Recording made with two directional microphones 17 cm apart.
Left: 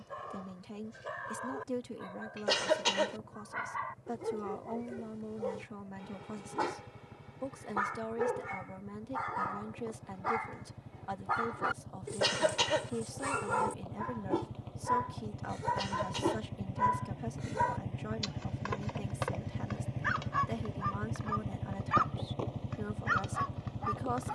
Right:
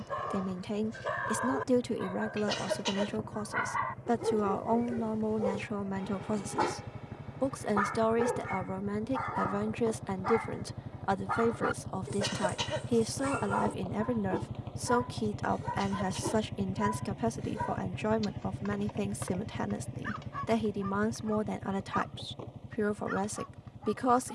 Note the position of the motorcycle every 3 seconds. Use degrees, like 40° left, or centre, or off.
60° right, 60° right, 50° right, 50° right, 30° right, 10° right, 10° left, 40° left.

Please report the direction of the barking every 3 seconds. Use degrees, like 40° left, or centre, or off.
40° right, 30° right, 20° right, centre, 20° left, 30° left, 40° left, 50° left.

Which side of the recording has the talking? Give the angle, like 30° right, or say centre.
60° right.